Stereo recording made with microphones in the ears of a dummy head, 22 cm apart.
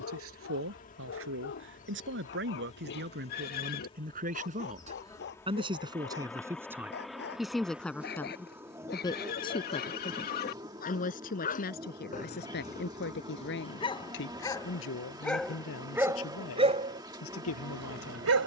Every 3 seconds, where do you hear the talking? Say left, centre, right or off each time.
right, right, centre, left, left, left.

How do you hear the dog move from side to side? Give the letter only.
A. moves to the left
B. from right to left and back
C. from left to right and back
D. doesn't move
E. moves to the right
E.